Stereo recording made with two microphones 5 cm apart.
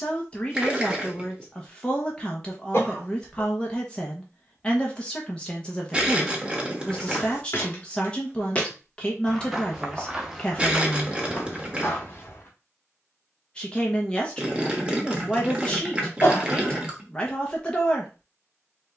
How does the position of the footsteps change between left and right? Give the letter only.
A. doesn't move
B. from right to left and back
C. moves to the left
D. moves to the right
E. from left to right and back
E.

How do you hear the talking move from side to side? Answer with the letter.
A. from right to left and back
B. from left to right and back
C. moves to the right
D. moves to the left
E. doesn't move
E.